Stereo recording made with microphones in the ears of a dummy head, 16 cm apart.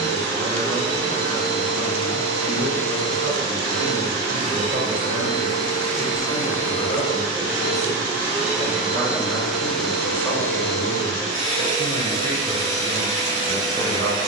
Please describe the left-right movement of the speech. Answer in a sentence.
You can hear the speech go left and come back.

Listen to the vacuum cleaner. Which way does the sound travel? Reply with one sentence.
You can hear the vacuum cleaner travel towards the left.